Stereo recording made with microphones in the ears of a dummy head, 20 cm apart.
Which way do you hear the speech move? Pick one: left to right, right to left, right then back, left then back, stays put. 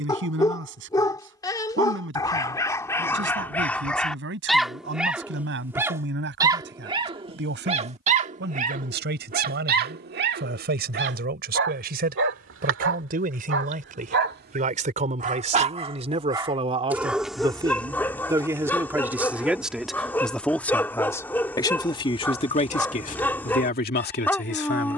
right to left.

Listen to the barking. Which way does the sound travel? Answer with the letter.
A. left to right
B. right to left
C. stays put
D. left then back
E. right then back
E.